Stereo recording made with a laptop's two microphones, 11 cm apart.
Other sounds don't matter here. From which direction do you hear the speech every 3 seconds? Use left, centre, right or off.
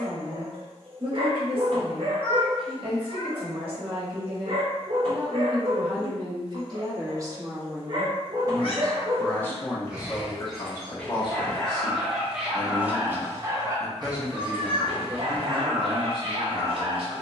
right, right, right, left, centre, right.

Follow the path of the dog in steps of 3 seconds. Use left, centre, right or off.
right, right, right, centre, right, right.